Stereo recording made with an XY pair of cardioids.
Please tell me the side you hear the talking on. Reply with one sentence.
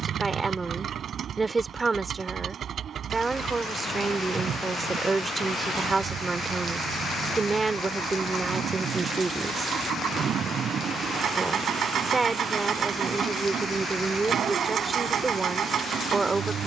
You can hear the talking on the right.